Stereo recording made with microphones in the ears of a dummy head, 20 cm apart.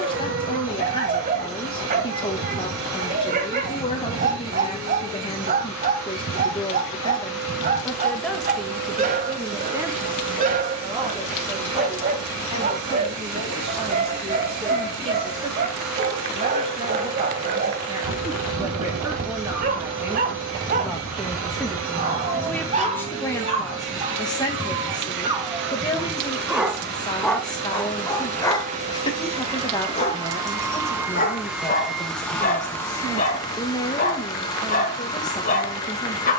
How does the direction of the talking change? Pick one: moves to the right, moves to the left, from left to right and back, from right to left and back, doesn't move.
from left to right and back.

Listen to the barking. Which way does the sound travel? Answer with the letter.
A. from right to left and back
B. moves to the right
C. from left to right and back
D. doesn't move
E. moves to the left
E.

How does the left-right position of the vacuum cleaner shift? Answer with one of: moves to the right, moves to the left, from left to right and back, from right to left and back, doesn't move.
moves to the left.